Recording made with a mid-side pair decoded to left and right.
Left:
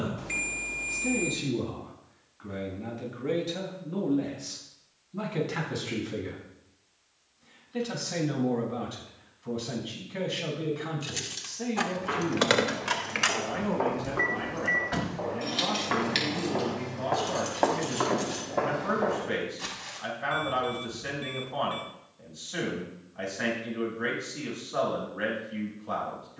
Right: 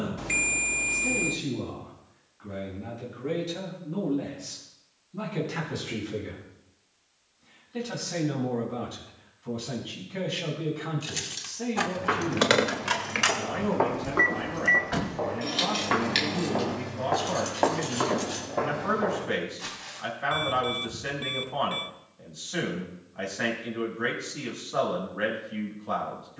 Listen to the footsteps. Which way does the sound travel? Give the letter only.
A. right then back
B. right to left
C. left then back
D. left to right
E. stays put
B.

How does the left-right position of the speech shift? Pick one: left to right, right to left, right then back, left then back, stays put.
left to right.